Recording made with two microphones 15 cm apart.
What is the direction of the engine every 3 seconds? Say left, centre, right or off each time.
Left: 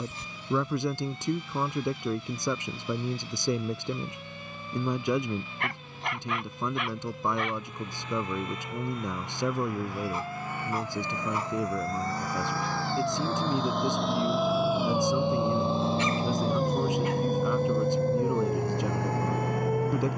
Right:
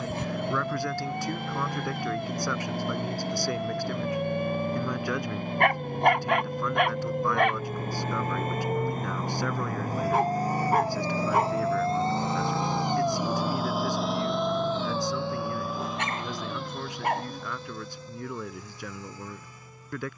right, right, right, right, centre, left, left.